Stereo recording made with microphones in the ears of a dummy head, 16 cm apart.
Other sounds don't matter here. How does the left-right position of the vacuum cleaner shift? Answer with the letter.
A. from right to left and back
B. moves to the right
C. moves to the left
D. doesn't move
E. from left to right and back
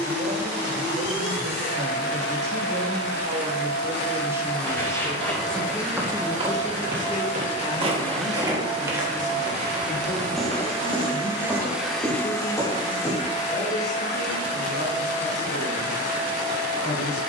E.